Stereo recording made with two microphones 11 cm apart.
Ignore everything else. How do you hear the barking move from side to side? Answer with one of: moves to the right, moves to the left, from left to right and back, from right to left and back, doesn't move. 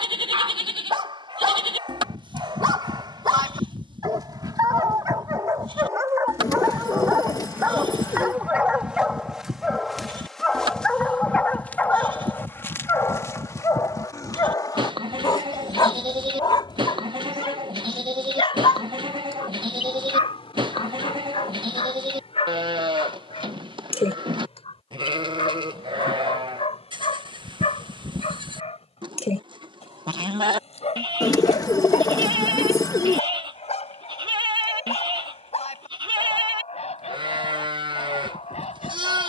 moves to the left.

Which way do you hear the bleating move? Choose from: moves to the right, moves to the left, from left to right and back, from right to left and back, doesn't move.
doesn't move.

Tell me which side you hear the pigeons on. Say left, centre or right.
left.